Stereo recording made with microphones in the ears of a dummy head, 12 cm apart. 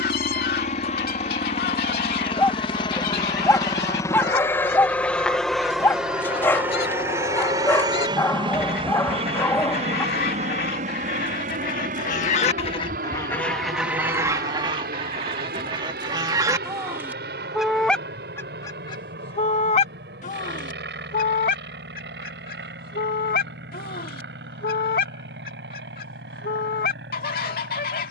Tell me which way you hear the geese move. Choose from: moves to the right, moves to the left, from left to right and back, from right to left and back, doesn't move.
from left to right and back.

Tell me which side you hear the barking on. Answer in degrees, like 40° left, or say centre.
20° left.